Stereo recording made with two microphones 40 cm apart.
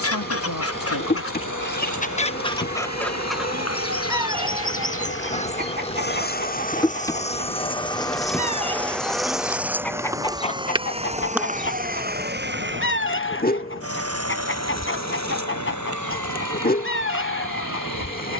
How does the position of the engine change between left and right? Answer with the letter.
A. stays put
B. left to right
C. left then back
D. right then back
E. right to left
B.